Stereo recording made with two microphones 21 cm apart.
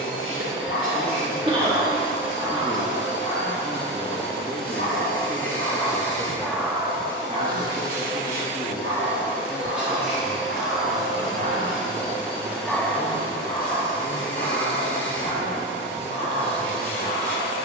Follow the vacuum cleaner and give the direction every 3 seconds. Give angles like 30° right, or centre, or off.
70° right, 50° right, 20° right, centre, 10° left, 10° left.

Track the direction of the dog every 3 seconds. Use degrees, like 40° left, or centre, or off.
60° left, 40° left, 30° right, 50° right, 20° left, 60° left.